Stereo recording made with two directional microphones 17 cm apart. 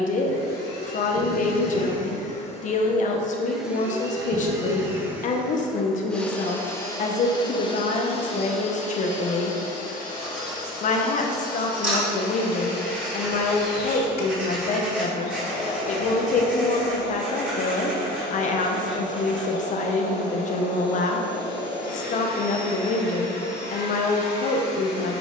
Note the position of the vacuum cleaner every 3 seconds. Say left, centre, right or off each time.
left, centre, left, left, left, left, left, left, left.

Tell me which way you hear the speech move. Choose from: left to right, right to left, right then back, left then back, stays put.
stays put.